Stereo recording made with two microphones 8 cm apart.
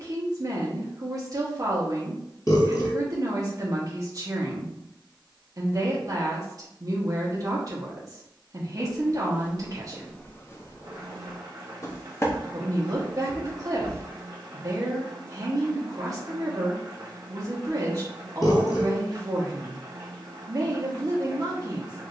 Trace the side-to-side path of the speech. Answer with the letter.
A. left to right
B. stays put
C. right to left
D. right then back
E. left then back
B.